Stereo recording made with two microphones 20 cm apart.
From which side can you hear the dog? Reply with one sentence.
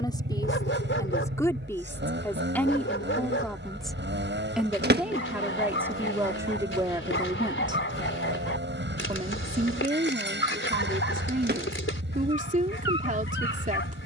You can hear the dog on the left.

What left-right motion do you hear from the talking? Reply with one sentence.
In this clip you hear the talking move from left to right.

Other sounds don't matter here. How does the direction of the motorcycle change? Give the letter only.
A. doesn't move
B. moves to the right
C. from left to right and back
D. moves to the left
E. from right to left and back
A.